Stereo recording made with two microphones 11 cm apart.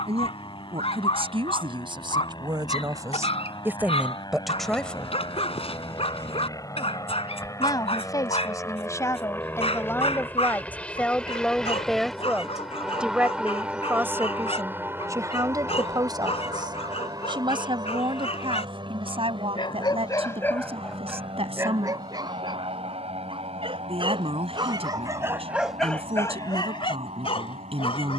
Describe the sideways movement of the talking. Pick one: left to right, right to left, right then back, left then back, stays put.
left then back.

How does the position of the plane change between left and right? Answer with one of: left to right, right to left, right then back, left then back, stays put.
left to right.